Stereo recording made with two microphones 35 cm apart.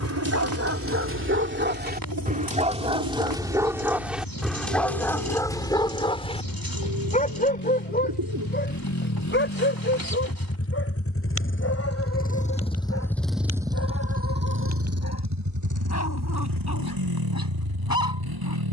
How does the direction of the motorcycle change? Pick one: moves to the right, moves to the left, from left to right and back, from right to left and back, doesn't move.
moves to the right.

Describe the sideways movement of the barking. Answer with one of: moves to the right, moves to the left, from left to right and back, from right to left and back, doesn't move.
moves to the left.